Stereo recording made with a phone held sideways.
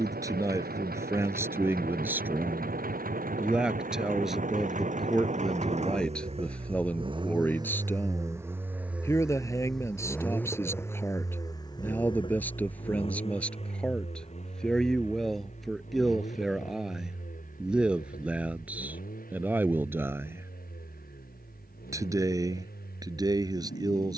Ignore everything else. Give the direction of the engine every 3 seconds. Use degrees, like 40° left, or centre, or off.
70° right, 50° right, 30° right, 10° left, 40° left, 50° left, 60° left, 60° left.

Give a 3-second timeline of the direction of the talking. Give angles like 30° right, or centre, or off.
20° right, centre, 10° left, 20° left, 10° left, centre, 10° right, 20° right.